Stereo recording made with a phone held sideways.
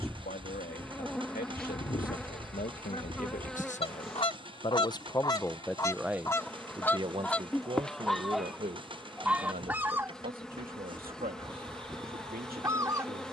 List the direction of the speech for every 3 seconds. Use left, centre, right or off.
left, left, right, right, right.